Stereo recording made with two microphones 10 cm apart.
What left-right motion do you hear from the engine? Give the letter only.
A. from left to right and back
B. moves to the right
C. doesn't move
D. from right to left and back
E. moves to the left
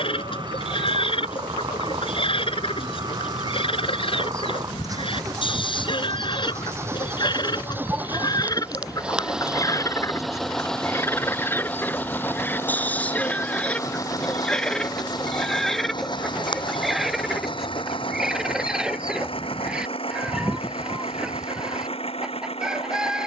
E.